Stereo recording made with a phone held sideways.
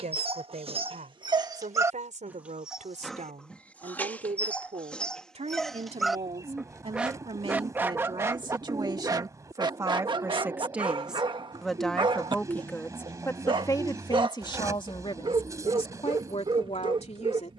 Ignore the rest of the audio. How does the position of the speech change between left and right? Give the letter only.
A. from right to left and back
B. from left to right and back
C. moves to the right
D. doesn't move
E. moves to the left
E.